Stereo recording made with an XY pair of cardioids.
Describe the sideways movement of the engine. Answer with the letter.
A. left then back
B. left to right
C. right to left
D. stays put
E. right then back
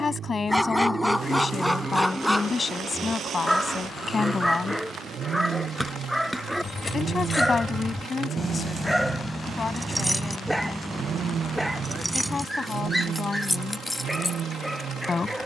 D.